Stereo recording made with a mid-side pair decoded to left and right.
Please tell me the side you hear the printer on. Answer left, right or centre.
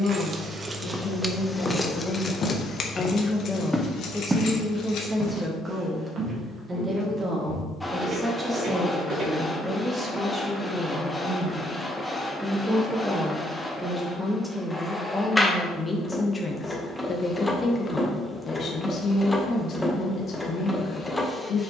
centre.